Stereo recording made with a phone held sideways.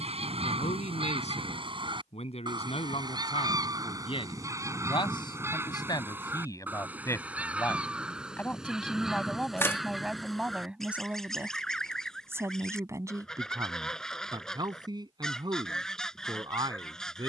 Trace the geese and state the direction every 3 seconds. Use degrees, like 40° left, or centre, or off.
40° right, 20° right, 10° right, centre, 10° left, 10° left.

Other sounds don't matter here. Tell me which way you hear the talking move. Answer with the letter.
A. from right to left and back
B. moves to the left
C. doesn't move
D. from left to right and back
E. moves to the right
E.